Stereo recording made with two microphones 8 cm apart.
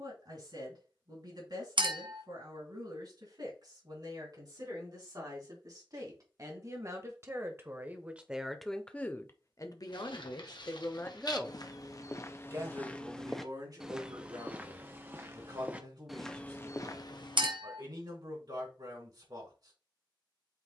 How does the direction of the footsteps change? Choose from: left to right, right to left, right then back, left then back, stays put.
right then back.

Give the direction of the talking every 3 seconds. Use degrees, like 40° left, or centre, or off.
60° right, 50° right, 20° right, 40° left, 50° right, 60° right, 60° right.